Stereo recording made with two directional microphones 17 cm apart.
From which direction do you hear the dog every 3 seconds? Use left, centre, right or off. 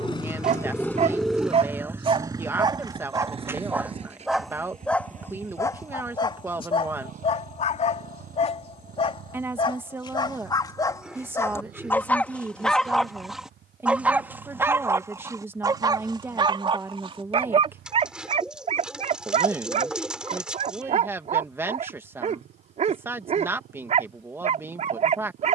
right, centre, left, left, centre, right, right, right, right.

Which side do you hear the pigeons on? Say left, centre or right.
centre.